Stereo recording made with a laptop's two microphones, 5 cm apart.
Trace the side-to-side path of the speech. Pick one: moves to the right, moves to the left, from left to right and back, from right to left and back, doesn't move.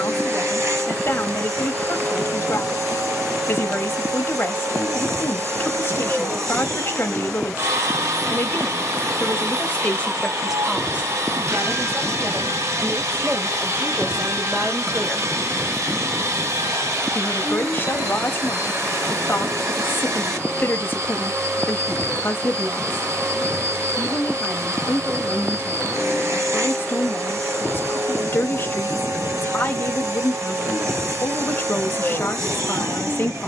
from left to right and back.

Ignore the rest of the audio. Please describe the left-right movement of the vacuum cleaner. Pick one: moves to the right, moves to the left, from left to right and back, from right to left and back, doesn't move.
doesn't move.